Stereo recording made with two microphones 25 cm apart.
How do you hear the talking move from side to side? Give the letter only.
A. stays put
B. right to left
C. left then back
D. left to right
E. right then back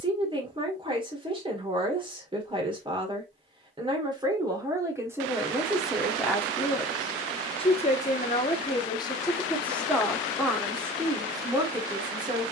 C.